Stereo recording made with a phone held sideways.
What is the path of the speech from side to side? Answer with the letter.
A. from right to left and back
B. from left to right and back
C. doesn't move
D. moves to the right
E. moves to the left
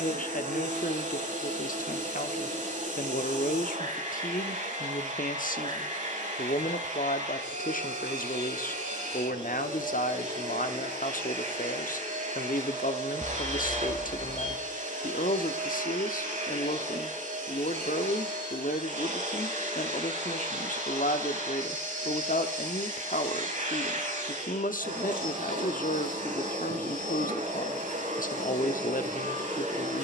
C.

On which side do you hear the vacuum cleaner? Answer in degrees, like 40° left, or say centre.
60° right.